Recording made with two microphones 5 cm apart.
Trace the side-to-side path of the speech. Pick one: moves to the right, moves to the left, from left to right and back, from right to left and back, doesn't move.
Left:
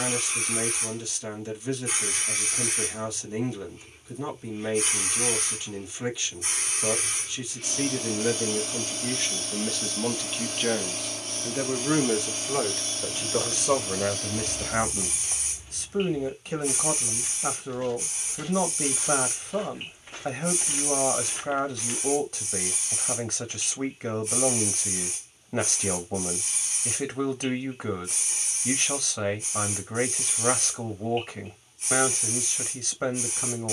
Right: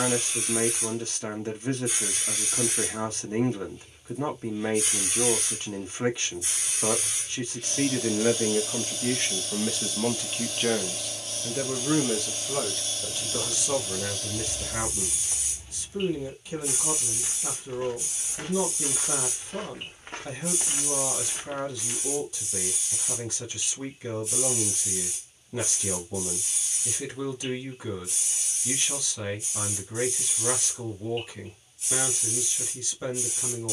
moves to the left.